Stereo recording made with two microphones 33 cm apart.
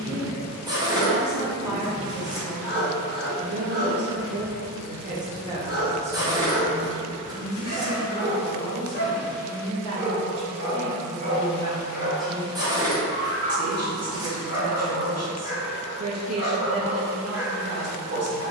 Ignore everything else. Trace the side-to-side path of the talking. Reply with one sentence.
You can hear the talking go left and come back.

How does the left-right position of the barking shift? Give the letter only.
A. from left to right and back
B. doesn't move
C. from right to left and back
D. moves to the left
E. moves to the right
B.